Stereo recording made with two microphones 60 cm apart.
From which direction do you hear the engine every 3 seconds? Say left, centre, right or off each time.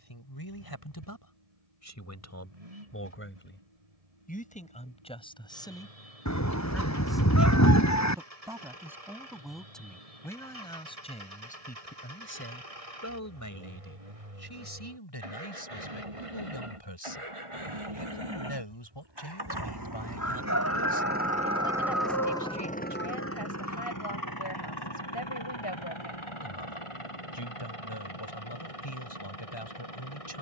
right, right, right, right, right, right, right, centre, left, left.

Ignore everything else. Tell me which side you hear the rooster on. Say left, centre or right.
left.